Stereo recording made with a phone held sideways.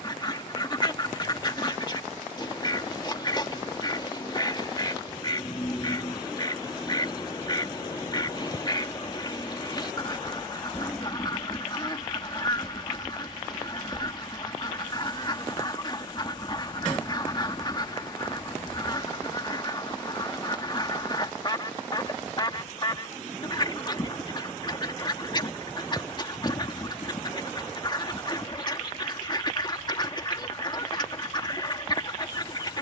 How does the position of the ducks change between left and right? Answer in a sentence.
You can hear the ducks stay in one place.